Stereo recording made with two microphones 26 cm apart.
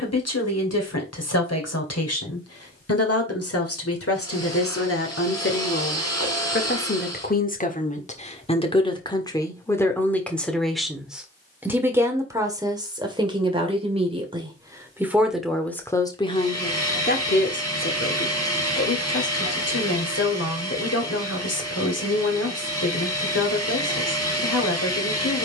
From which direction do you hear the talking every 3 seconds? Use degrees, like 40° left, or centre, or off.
70° left, 60° left, 30° left, centre, 20° right, 20° left, 70° left, 70° left, 70° left.